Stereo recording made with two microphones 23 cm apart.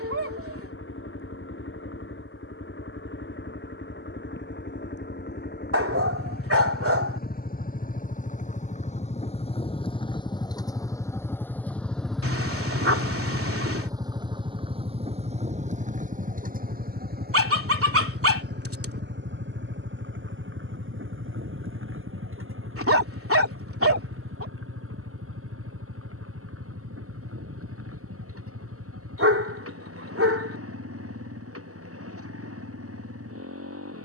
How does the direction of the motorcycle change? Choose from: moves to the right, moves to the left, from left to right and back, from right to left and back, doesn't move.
moves to the right.